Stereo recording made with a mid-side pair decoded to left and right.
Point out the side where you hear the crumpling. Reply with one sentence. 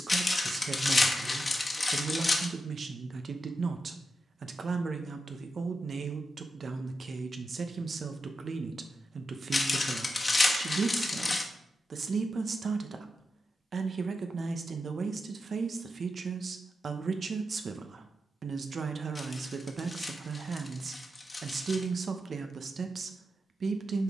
You can hear the crumpling on the left.